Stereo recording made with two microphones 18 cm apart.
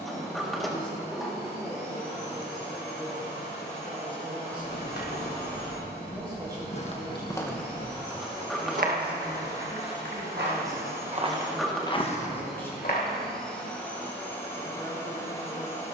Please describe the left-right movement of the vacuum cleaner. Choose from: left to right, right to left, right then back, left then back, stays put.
right to left.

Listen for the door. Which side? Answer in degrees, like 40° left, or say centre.
centre.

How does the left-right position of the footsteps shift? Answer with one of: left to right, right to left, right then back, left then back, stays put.
right then back.